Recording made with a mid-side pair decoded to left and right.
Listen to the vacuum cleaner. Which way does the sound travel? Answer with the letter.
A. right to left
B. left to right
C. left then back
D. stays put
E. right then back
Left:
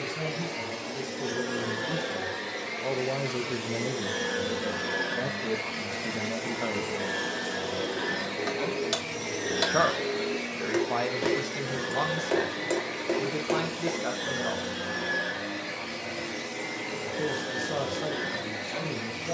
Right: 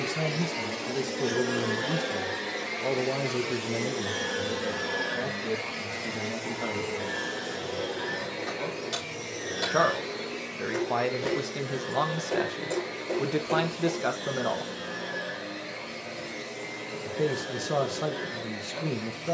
A.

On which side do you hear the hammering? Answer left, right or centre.
left.